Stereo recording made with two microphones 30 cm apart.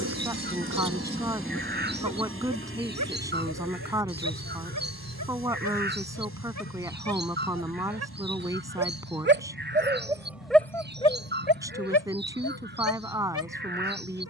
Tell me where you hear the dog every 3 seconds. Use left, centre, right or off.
right, right, right, centre, left.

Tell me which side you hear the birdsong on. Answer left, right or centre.
right.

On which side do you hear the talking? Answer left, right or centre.
centre.